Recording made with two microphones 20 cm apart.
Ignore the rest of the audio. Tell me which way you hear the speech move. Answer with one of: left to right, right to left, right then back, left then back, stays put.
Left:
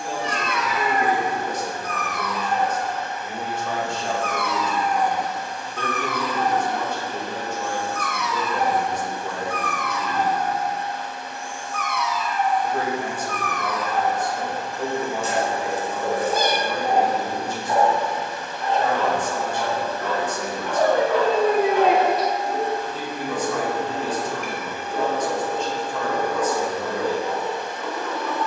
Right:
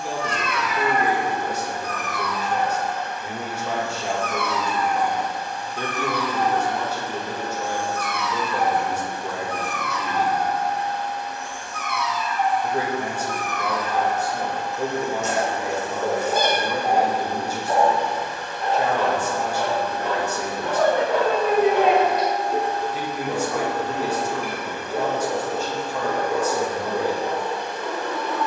stays put.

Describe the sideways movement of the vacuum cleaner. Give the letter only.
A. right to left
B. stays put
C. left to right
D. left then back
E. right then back
B.